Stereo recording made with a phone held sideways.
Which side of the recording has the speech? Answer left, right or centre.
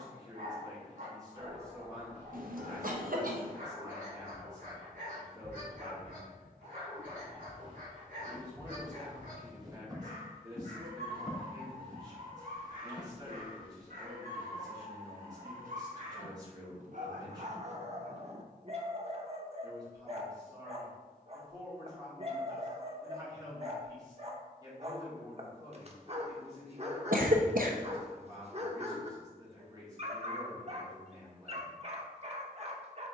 right.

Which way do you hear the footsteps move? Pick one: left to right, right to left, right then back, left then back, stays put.
right to left.